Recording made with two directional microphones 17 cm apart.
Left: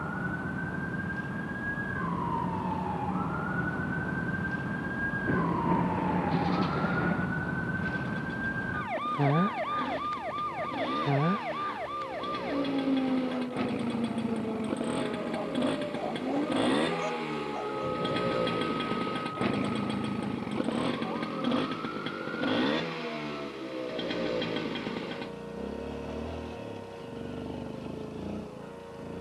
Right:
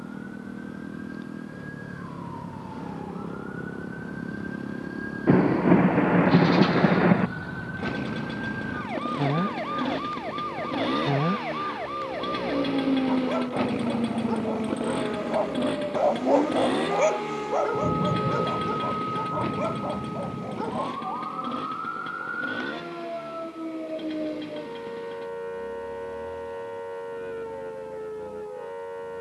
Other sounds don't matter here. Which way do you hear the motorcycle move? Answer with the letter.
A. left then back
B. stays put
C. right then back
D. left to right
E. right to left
E.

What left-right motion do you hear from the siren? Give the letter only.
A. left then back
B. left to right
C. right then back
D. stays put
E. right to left
B.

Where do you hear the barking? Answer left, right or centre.
right.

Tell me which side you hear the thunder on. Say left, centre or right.
right.